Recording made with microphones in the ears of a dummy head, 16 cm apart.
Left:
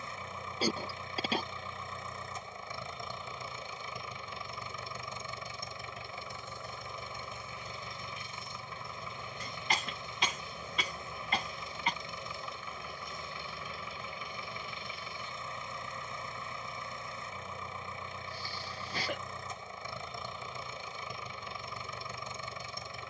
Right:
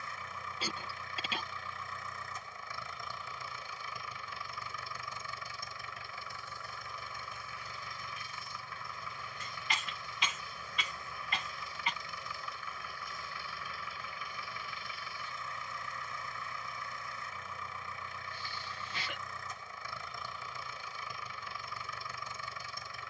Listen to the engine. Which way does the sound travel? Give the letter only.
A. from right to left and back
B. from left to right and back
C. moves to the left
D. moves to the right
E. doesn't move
E.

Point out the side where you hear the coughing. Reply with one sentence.
You can hear the coughing on the left.